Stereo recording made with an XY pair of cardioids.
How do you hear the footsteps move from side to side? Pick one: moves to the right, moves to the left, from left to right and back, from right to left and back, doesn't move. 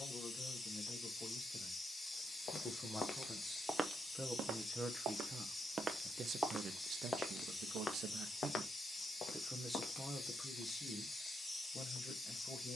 from left to right and back.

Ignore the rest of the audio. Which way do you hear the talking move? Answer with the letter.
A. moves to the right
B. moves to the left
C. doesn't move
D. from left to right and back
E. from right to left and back
D.